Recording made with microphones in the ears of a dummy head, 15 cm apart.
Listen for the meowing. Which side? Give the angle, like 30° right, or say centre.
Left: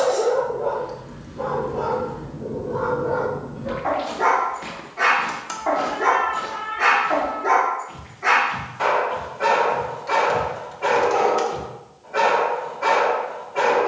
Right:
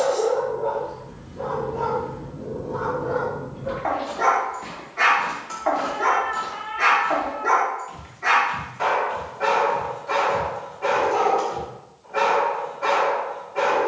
20° right.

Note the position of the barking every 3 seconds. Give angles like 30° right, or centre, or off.
centre, 40° right, 10° right, 10° left, 10° left.